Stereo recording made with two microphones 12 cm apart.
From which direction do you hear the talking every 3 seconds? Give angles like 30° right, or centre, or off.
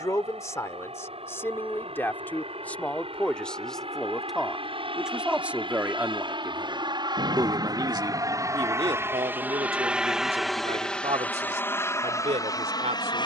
20° left, centre, 30° right, 60° right, 70° right.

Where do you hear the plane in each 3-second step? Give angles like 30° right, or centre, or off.
70° right, 60° right, 40° right, centre, 30° left.